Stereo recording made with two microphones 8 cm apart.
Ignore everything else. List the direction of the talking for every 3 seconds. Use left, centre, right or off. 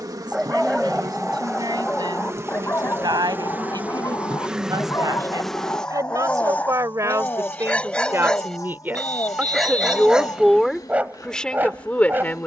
right, right, right, centre.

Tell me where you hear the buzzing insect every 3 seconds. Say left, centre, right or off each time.
right, centre, left, left.